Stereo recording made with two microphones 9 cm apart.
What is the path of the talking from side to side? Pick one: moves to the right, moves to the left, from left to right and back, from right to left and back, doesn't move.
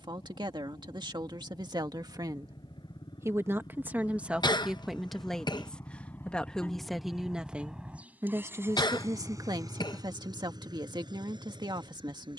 from right to left and back.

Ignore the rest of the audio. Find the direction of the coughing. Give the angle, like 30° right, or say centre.
60° left.